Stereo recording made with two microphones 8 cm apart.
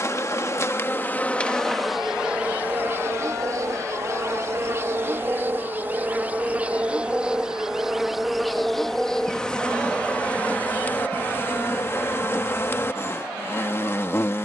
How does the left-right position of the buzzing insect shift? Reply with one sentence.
You can hear the buzzing insect go right and come back.